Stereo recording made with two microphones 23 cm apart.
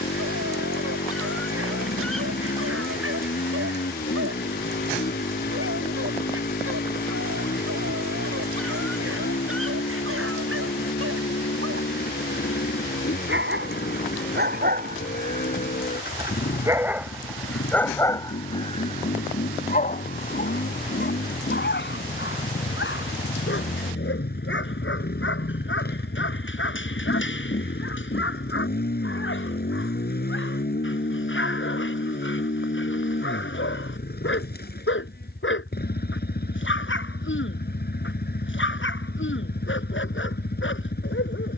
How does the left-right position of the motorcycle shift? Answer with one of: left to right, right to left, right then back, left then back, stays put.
stays put.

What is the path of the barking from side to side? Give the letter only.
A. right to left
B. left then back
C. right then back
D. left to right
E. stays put
A.